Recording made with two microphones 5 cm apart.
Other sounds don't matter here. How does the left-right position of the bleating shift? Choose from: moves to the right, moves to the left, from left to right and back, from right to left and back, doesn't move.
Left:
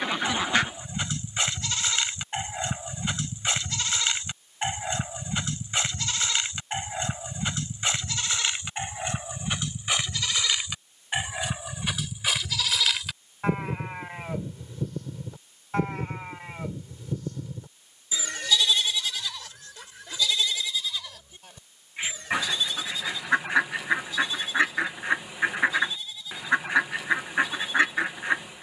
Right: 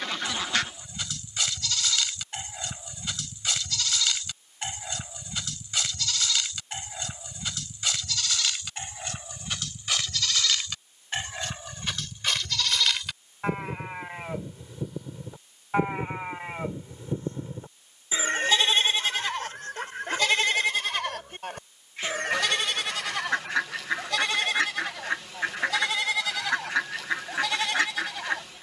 moves to the right.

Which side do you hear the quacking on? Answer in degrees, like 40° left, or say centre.
20° left.